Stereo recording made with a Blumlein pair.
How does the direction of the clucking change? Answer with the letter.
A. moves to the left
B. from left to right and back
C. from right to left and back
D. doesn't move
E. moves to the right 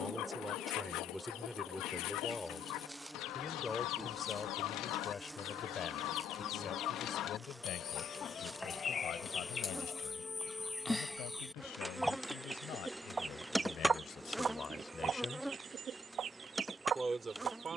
E.